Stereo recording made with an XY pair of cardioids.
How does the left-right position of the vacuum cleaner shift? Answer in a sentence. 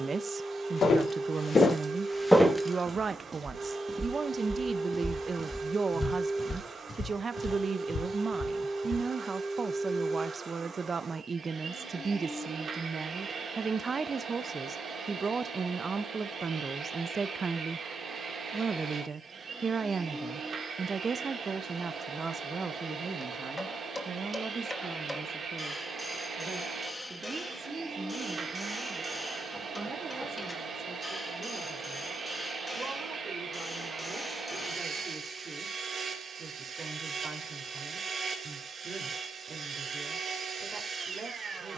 In this clip you hear the vacuum cleaner stay in one place.